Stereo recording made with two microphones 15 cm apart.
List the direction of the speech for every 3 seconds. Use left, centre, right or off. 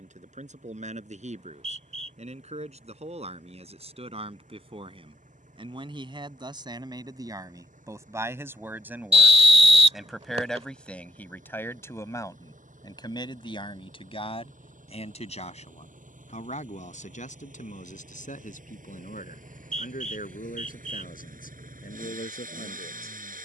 right, right, right, centre, left, left, left, left.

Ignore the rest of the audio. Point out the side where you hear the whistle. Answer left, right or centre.
right.